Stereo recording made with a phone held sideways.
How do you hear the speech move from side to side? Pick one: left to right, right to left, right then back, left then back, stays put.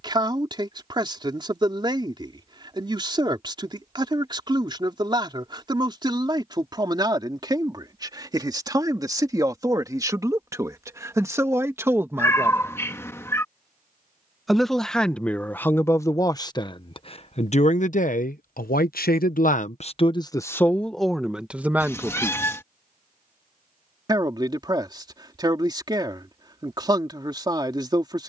left then back.